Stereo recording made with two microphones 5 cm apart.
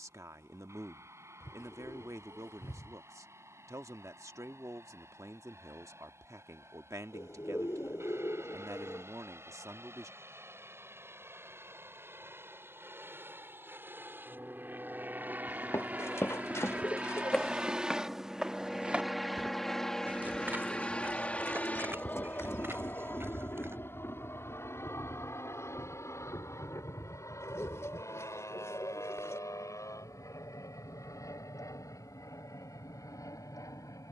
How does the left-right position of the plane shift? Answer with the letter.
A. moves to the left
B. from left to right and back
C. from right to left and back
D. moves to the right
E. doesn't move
A.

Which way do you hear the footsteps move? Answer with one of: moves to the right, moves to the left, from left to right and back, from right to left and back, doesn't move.
moves to the right.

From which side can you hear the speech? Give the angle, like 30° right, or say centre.
70° right.